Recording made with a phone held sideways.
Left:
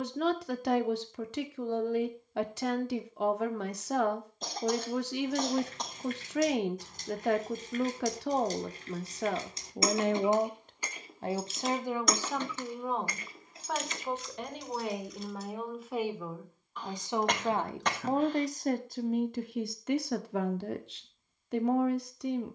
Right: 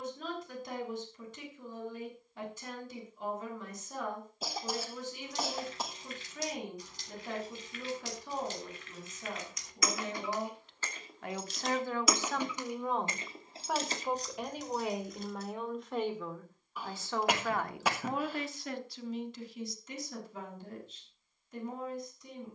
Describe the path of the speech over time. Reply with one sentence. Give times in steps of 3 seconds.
You can hear the speech on the left from 0 s, in the centre from 12 s and on the left from 18 s.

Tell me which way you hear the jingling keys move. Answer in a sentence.
In this clip you hear the jingling keys go from the left side to the right.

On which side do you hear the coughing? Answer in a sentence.
You can hear the coughing in the centre.